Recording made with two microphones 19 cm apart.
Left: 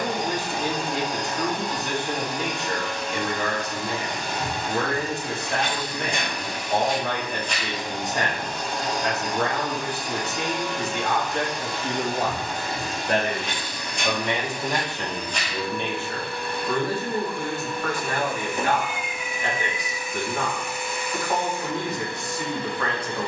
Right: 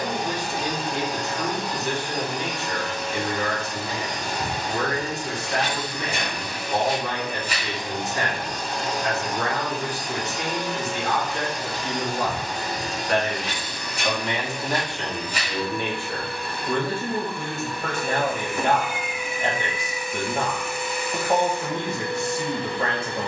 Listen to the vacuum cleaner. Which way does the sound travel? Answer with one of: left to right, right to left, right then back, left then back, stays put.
stays put.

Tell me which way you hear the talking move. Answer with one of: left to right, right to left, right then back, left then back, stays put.
left to right.